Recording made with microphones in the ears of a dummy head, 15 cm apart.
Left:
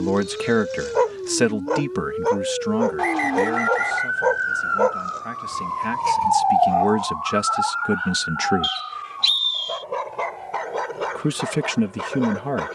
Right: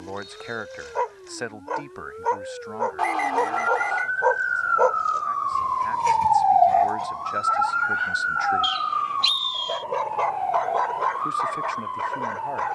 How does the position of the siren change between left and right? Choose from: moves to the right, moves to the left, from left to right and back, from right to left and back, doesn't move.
moves to the right.